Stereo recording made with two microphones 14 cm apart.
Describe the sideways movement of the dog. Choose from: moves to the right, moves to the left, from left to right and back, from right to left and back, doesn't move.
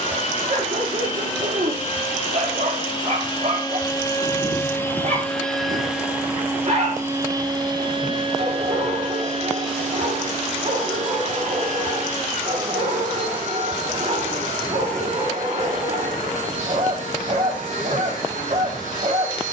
doesn't move.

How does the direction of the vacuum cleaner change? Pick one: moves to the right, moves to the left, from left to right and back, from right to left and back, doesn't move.
moves to the right.